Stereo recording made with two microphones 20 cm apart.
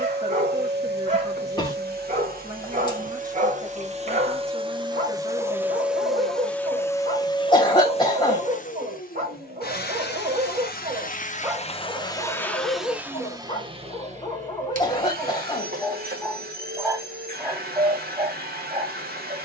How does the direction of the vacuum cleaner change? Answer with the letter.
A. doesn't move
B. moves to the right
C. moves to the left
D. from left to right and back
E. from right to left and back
E.